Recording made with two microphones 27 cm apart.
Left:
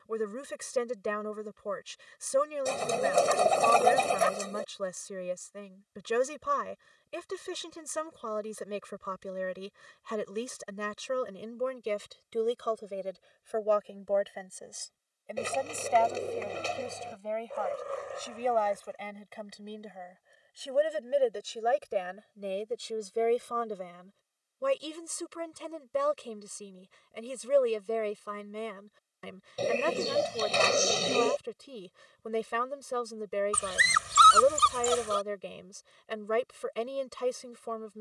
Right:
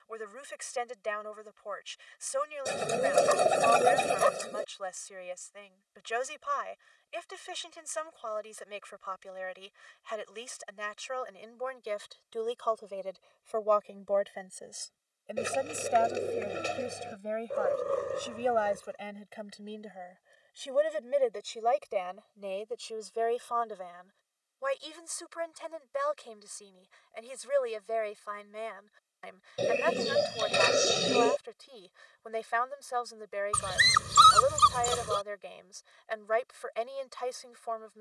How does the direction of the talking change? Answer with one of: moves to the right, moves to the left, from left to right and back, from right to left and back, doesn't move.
from left to right and back.